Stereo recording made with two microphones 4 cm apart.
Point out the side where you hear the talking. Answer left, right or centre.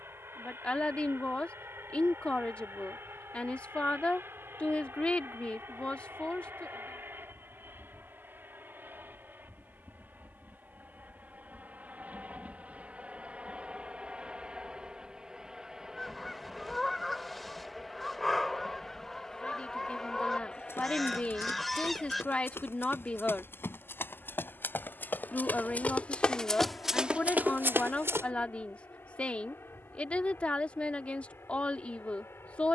left.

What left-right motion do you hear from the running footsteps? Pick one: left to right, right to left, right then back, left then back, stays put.
left to right.